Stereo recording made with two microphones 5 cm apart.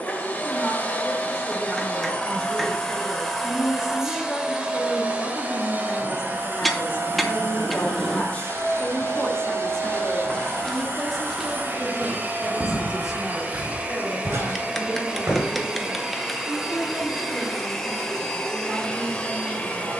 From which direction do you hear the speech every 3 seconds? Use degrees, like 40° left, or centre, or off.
20° right, 30° left, 40° left, 10° left, 10° right, 20° right, 20° right.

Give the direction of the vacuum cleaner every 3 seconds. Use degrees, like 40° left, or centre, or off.
20° left, 20° right, 50° right, 50° right, 30° right, 10° right, 10° left.